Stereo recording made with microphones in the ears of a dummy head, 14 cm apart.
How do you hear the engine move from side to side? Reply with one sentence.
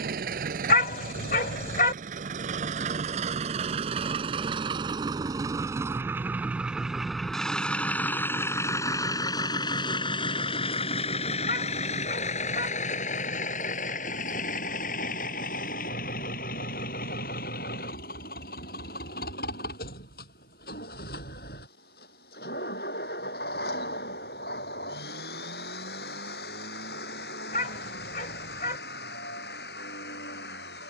You can hear the engine go from the right side to the left.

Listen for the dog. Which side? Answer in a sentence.
You can hear the dog on the left.